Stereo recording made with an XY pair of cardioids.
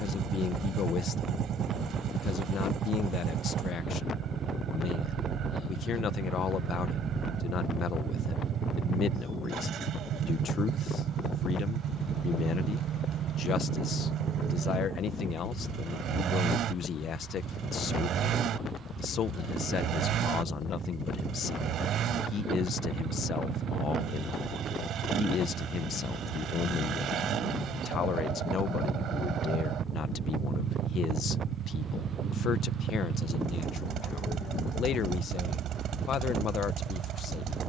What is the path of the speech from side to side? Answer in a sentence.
In this clip you hear the speech stay in one place.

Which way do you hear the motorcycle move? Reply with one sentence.
You can hear the motorcycle stay put.